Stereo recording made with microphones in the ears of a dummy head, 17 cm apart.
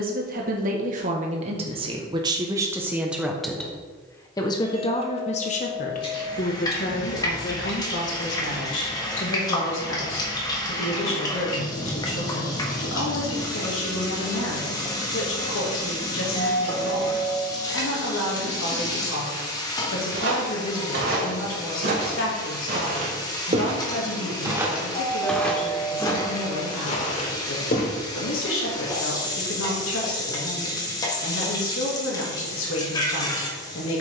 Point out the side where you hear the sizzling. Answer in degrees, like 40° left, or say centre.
20° left.